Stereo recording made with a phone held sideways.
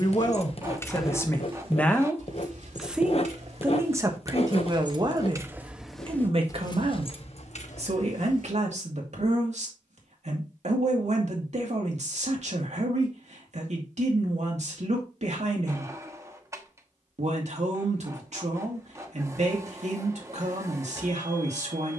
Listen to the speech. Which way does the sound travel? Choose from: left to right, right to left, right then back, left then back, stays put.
left to right.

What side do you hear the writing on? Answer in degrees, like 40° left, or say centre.
50° left.